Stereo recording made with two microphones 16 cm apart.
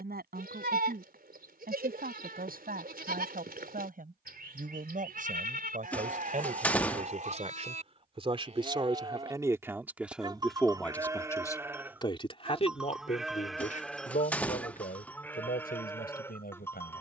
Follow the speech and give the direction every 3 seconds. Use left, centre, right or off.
right, right, right, centre, left, left.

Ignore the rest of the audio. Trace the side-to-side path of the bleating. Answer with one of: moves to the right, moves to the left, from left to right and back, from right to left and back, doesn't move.
moves to the left.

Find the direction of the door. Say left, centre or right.
centre.